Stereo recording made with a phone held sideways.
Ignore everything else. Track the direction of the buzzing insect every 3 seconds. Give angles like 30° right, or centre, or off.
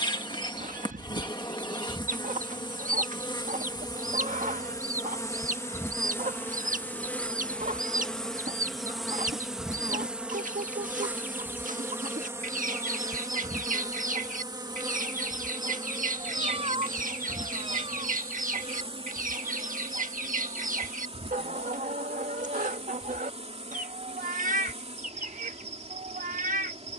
30° left, 30° left, 10° left, 10° right, 30° right, 40° right, 50° right, 50° right, 50° right.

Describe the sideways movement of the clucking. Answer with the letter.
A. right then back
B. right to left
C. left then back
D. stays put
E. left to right
D.